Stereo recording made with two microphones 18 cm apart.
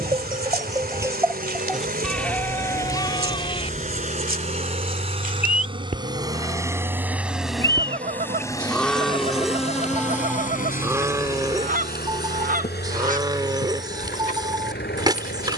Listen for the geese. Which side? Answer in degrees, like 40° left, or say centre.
50° right.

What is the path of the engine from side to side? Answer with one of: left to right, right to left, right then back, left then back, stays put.
right to left.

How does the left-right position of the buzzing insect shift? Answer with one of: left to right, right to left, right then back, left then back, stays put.
right to left.